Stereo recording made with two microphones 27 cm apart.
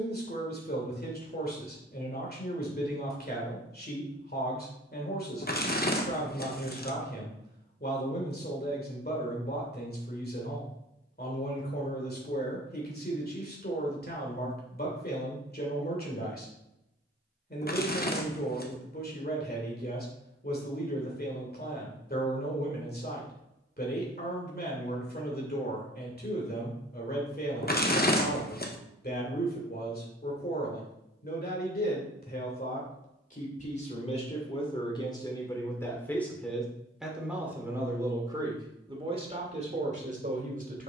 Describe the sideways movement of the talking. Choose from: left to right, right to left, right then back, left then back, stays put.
left to right.